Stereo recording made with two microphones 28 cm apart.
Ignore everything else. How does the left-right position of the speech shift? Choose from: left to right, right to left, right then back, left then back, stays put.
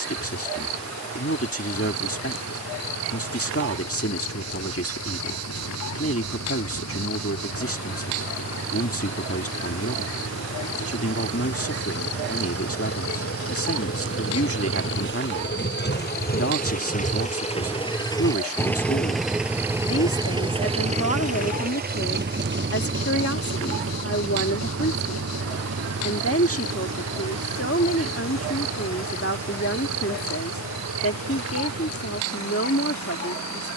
stays put.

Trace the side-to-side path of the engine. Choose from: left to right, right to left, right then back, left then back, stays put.
left to right.